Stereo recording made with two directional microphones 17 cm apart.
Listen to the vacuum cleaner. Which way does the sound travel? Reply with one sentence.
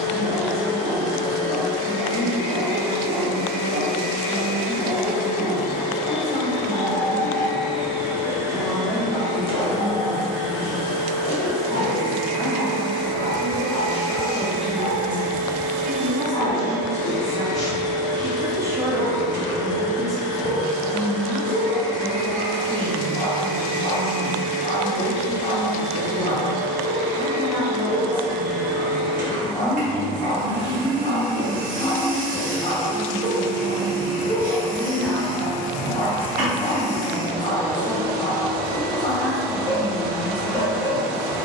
You can hear the vacuum cleaner go from the left side to the right.